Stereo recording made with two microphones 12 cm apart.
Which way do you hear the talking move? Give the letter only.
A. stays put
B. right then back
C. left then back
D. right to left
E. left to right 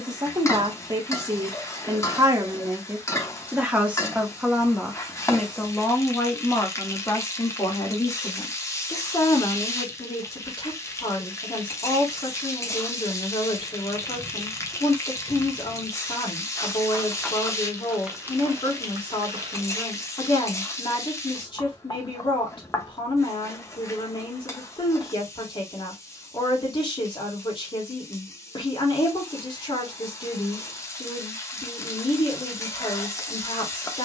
D.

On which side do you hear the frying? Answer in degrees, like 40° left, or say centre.
30° left.